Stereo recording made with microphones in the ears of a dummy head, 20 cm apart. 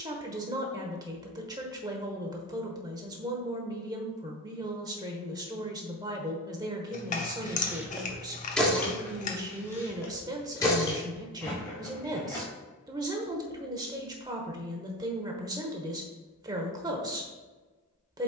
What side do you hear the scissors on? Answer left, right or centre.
left.